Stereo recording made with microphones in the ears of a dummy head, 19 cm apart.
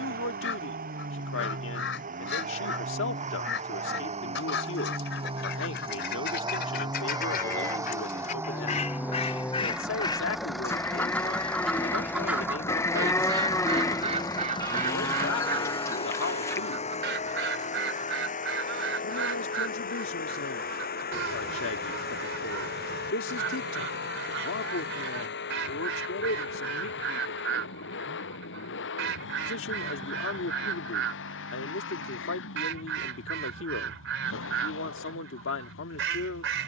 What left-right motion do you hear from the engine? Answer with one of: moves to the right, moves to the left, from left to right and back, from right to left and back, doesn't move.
moves to the left.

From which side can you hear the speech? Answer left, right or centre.
left.